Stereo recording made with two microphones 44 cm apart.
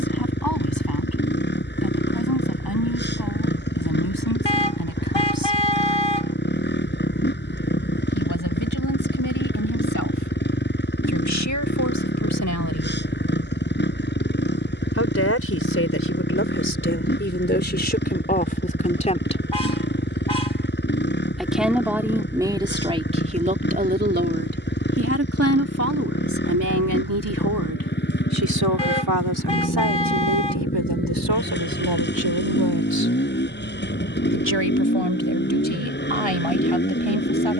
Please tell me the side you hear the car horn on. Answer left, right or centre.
left.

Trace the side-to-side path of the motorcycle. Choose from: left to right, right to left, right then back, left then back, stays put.
stays put.